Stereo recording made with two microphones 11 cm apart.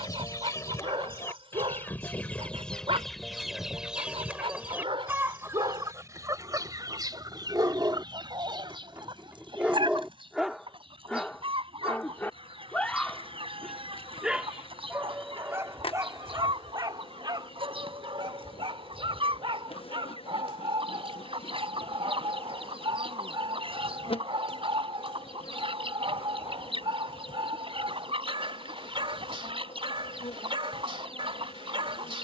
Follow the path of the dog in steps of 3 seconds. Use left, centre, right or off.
right, right, right, centre, centre, right, right, right, right, right, right.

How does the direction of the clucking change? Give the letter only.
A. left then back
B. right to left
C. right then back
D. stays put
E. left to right
E.